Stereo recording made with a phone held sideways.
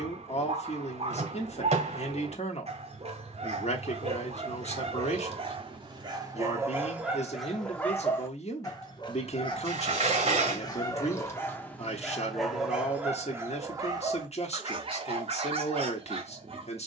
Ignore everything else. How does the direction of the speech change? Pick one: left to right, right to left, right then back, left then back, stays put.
stays put.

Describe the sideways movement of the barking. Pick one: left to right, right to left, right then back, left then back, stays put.
left then back.